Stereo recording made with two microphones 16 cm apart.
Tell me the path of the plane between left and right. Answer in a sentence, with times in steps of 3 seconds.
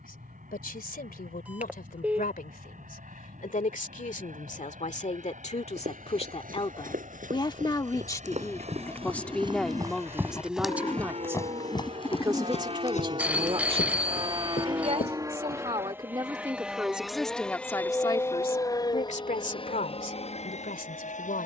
You can hear the plane on the right from 0 s, in the centre from 15 s and on the left from 18 s.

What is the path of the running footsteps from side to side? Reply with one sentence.
You can hear the running footsteps move from right to left.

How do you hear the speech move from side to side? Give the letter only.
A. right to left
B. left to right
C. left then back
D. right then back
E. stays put
D.